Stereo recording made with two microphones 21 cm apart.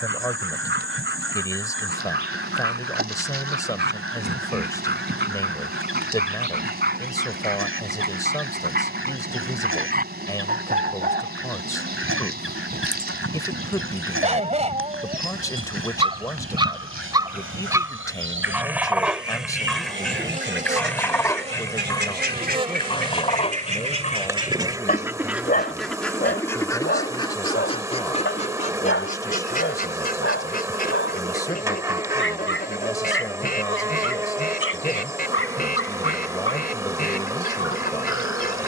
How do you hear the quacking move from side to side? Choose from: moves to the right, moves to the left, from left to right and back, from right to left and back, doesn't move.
moves to the left.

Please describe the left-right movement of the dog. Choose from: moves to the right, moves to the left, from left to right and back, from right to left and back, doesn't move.
moves to the left.